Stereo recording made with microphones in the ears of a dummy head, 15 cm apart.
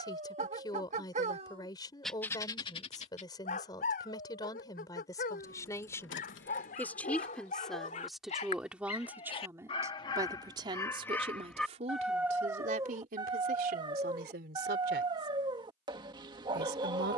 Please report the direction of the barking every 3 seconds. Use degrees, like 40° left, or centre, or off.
20° right, 60° left, 50° left, 20° left, 20° right, 30° right.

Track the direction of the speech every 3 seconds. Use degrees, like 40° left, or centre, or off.
20° left, 20° left, centre, 30° right, 60° right, 70° right.